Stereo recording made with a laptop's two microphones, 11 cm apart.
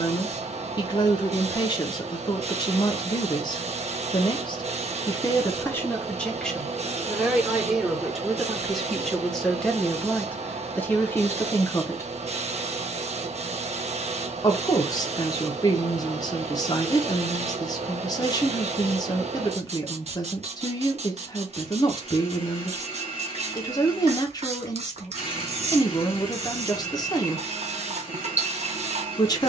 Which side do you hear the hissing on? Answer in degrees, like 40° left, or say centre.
60° right.